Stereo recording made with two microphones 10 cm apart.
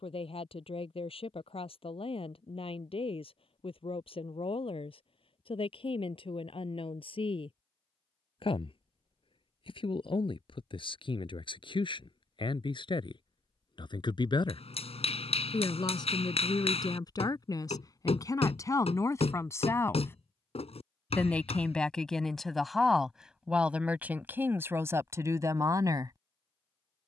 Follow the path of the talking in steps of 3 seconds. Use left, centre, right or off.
left, left, left, left, left, left, left, centre, right.